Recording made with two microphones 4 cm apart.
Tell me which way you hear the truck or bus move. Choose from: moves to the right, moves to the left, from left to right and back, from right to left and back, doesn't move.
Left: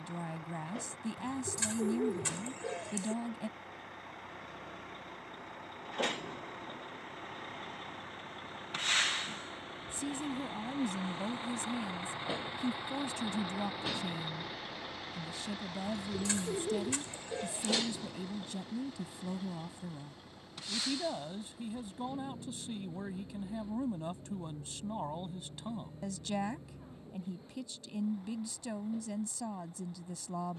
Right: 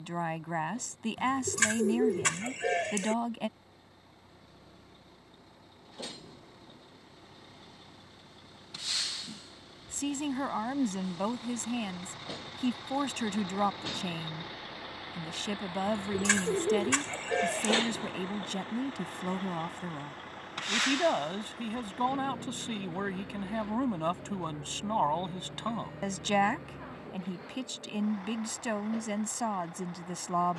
moves to the right.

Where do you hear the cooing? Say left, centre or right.
right.